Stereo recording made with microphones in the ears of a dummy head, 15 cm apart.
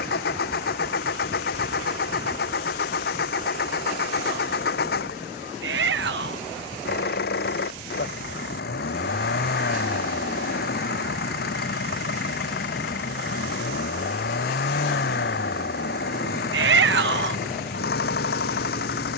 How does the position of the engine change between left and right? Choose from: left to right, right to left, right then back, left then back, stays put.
stays put.